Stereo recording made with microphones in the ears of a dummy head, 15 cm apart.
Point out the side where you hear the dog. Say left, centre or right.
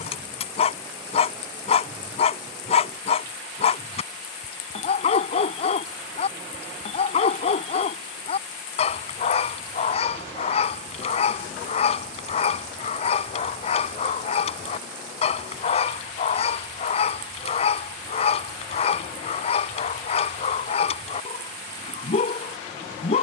left.